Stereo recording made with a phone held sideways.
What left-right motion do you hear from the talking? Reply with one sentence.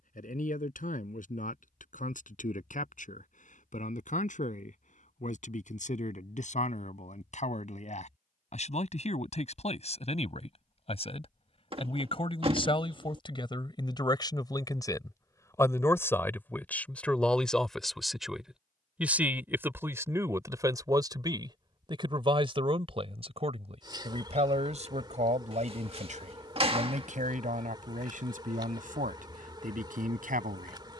In this clip you hear the talking move to the right.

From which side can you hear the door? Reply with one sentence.
You can hear the door on the right.